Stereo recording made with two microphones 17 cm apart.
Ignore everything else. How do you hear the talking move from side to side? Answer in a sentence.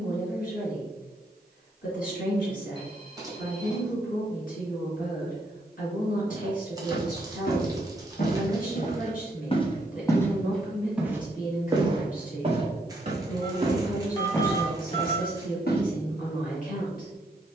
You can hear the talking stay in one place.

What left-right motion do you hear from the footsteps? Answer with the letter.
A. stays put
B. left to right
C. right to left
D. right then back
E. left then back
D.